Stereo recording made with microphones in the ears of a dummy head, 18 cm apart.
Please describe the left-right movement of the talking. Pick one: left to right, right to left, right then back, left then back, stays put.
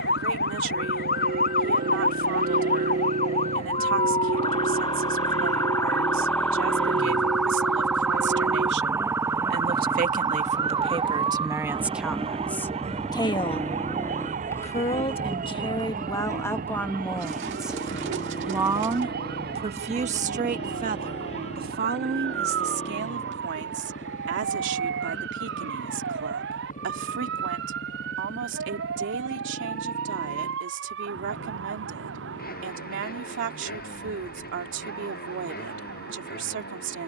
left then back.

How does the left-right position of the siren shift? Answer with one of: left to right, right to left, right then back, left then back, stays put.
left to right.